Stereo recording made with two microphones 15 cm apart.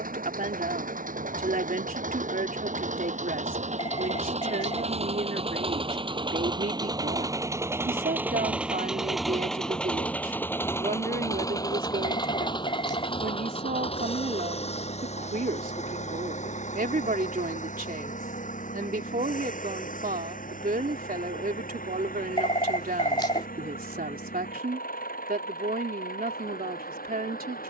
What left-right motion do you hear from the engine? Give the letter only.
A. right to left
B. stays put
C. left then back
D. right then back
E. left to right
A.